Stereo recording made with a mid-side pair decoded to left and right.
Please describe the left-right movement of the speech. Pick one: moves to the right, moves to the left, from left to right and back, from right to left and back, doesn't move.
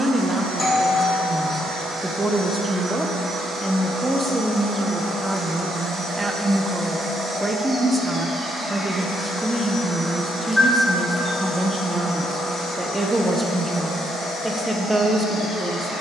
doesn't move.